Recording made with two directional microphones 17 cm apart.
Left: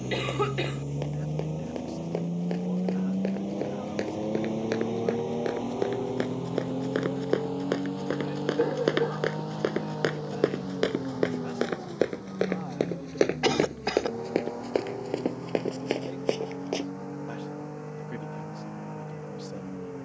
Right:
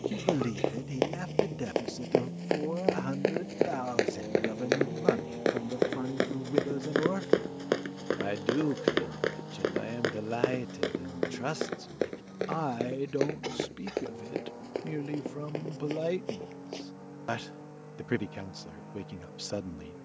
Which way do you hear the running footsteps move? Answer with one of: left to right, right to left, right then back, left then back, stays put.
right to left.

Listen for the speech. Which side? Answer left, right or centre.
right.